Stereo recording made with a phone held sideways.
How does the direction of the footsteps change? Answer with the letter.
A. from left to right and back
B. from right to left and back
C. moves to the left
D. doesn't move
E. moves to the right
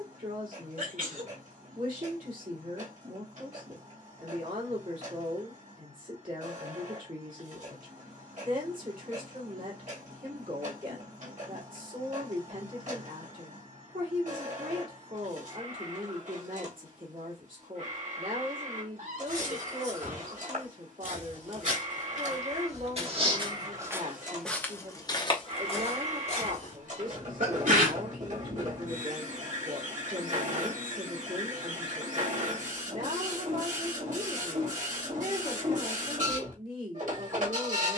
C.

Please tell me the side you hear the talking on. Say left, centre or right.
right.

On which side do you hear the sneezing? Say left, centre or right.
right.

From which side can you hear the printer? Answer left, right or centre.
right.